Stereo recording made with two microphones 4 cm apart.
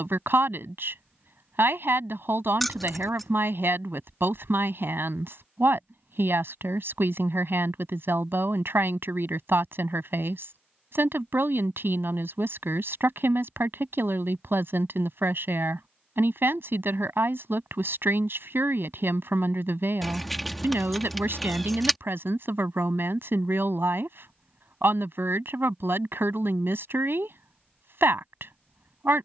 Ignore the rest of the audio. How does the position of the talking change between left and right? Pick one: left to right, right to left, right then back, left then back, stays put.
stays put.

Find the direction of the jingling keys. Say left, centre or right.
centre.